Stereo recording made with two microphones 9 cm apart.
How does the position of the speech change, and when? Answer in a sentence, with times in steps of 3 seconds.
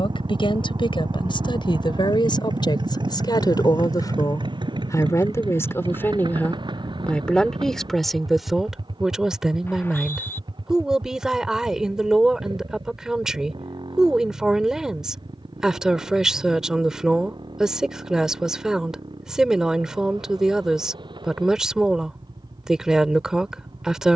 You can hear the speech on the left from 0 s and in the centre from 6 s.